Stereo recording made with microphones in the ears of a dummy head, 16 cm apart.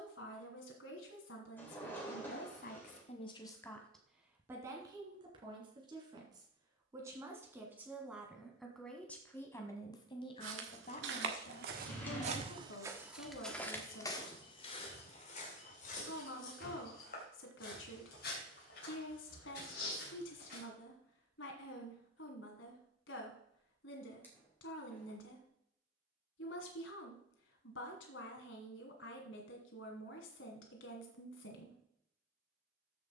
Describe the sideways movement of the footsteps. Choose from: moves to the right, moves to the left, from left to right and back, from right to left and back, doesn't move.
moves to the left.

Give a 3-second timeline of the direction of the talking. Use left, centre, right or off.
left, centre, centre, left, left, left, left, left, left, left, left.